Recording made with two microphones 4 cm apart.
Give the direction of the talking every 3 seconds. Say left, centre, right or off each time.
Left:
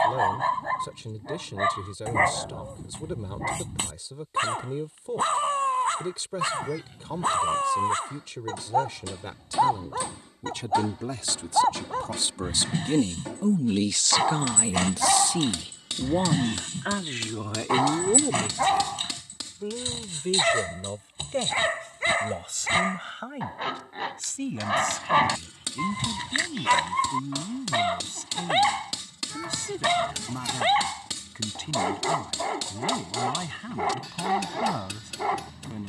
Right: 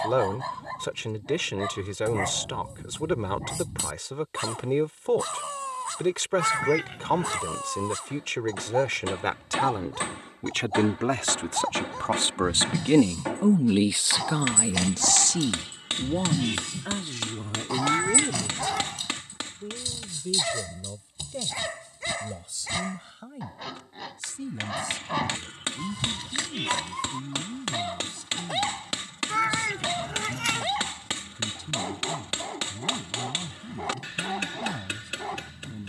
right, right, right, right, right, left, left, left, left, left, left, left.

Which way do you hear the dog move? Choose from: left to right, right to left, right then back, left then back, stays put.
stays put.